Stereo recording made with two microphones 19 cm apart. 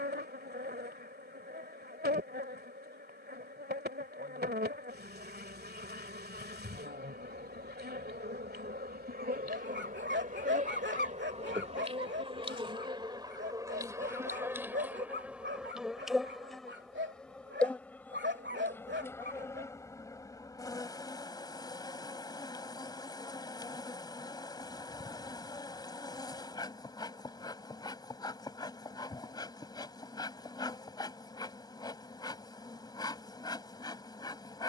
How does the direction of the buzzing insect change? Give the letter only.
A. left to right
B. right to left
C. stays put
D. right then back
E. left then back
B.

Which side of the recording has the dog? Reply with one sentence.
You can hear the dog on the right.